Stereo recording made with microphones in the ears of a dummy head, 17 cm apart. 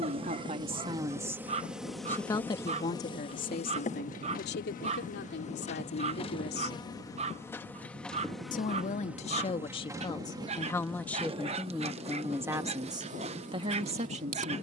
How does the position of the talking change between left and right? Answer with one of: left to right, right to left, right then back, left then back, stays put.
left then back.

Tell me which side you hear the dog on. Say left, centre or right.
right.